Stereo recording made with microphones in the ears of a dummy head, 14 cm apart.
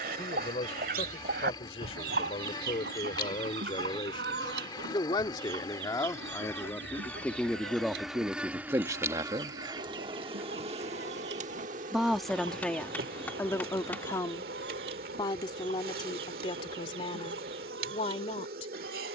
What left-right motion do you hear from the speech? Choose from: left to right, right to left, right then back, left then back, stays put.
right then back.